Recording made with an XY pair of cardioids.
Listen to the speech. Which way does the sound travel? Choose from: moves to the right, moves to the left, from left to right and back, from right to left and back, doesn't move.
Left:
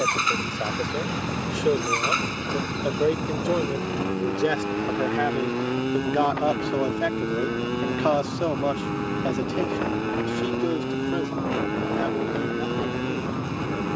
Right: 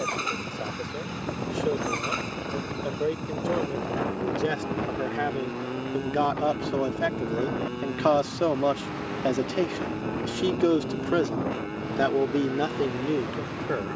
moves to the right.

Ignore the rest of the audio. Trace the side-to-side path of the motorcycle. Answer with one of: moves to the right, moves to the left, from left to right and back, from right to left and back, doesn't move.
doesn't move.